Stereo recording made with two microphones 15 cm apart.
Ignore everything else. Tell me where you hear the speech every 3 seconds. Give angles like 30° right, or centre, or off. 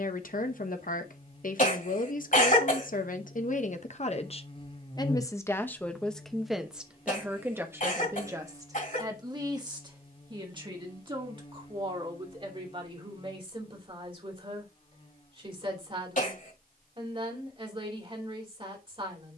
60° left, 40° left, 10° right, 30° right, 40° right, 40° right, 40° right.